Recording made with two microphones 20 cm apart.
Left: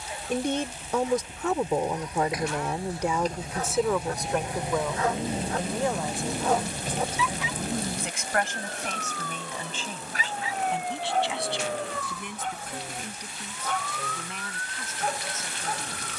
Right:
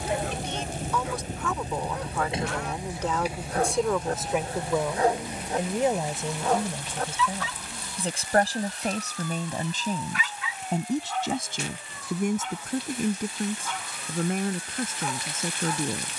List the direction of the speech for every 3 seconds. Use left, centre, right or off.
left, centre, right, right, right, right.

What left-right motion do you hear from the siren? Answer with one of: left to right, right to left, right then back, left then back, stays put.
right to left.